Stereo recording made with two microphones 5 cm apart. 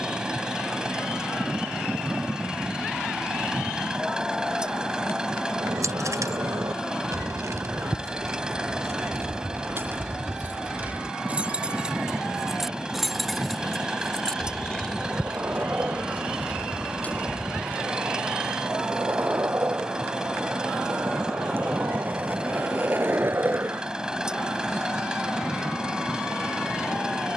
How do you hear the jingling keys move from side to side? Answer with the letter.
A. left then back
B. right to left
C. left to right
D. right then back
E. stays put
B.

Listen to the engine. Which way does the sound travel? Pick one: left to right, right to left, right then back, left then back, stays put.
stays put.